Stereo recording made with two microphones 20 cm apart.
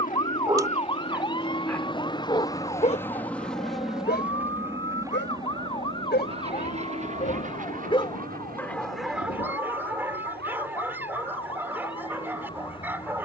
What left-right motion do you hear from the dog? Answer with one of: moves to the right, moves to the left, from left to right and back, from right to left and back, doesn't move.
from right to left and back.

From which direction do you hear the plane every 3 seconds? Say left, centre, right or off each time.
left, centre, right, right, right.